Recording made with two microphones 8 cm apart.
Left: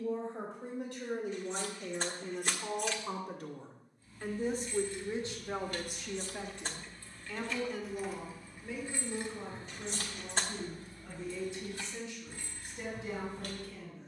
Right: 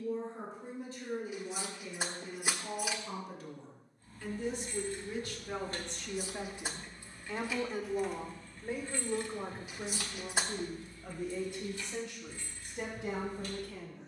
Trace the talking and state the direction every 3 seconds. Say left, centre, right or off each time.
left, left, right, right, right.